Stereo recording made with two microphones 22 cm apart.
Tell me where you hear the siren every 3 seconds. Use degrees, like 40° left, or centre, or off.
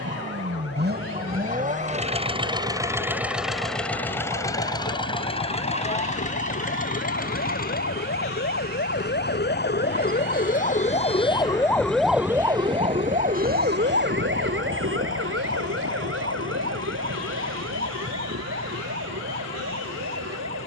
80° left, 70° left, 60° left, 40° left, 40° right, 70° right, 80° right.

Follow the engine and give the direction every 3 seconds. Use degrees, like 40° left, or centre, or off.
40° right, 10° left, 40° left, 50° left, 60° left, 60° left, 60° left.